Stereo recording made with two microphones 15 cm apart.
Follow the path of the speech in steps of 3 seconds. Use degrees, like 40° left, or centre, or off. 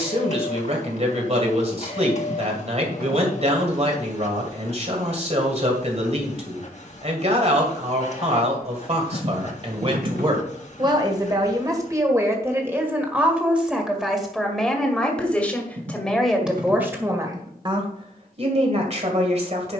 40° right, 40° right, 40° right, 30° right, 10° right, 10° right, 40° right.